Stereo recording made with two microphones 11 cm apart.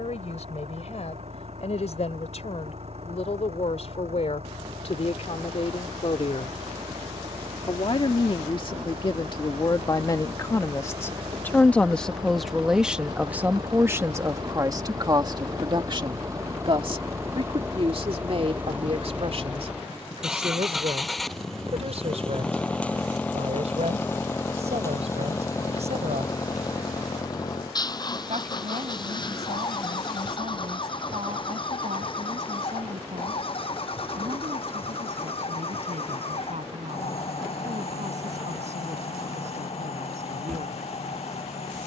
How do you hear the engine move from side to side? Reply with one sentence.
You can hear the engine travel towards the left.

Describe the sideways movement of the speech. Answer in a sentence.
You can hear the speech move from left to right.